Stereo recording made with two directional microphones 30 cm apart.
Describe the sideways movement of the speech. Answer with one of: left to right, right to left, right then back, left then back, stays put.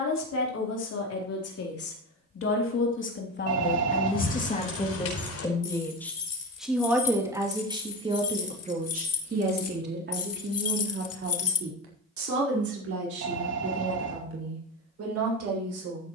left to right.